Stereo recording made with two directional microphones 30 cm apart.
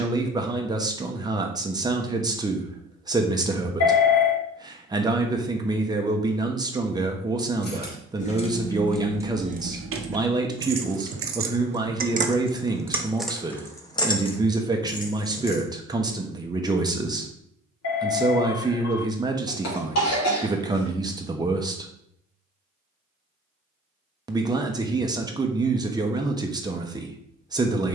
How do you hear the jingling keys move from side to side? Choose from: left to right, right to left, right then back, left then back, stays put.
right then back.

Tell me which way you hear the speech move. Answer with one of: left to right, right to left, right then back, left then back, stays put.
stays put.